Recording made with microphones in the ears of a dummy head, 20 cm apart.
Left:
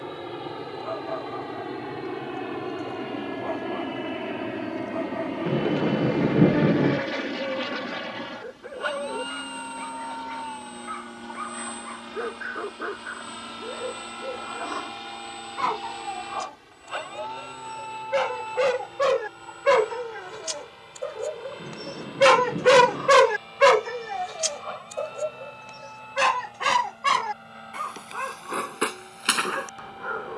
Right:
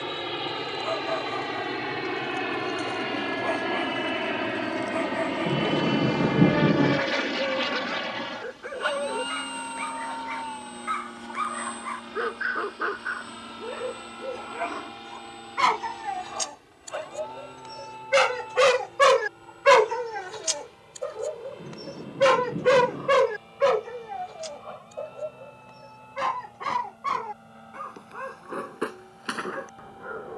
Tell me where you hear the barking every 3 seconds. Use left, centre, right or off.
right, right, right, right, right, right, right, left, left, left.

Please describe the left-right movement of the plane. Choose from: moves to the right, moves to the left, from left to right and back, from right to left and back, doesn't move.
moves to the left.